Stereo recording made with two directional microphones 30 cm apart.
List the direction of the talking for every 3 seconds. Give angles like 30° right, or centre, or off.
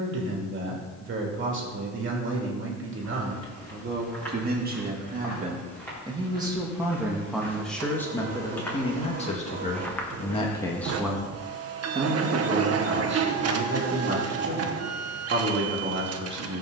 40° right, 30° right, centre, 10° left, 40° right, 40° right.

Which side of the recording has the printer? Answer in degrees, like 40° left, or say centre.
50° right.